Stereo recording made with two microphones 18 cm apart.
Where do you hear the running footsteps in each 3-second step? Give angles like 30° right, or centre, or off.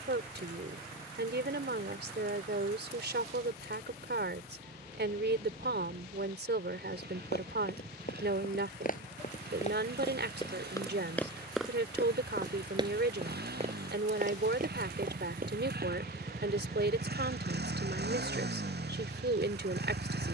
off, off, 60° left, 20° left, 30° right, 50° right, off.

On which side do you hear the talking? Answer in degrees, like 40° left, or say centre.
80° right.